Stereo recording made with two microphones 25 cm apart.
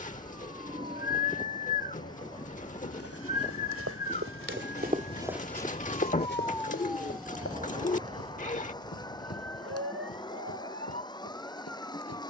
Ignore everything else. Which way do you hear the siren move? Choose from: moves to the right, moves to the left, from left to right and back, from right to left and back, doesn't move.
moves to the right.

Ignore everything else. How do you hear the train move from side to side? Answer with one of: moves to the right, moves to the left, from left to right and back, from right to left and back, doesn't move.
doesn't move.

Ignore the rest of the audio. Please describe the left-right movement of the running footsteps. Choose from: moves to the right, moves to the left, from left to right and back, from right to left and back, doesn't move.
moves to the left.